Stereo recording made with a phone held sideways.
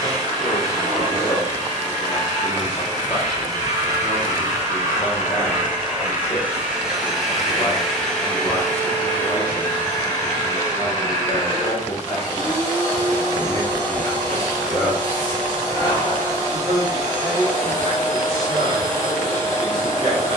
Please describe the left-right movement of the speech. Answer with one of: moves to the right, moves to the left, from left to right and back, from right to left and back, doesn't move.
moves to the right.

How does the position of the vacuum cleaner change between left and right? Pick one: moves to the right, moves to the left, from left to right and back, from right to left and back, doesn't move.
moves to the left.